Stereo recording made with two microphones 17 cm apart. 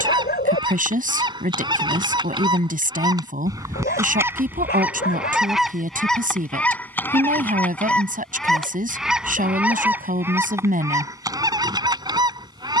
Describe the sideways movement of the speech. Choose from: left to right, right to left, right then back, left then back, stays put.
stays put.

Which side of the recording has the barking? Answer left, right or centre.
left.